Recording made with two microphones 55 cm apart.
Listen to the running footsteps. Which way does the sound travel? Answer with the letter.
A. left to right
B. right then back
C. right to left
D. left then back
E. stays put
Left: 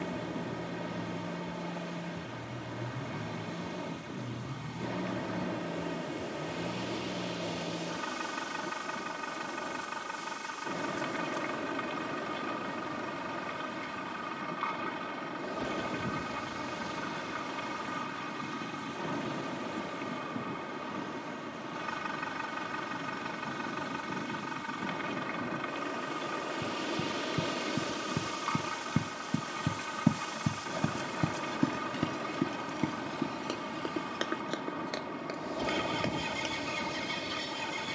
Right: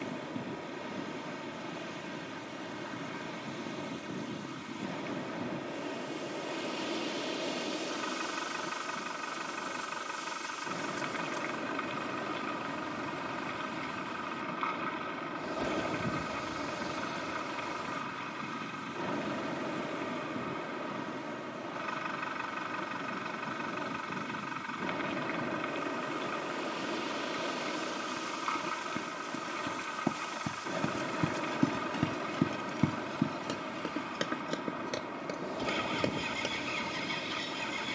A.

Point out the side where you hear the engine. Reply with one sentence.
You can hear the engine on the left.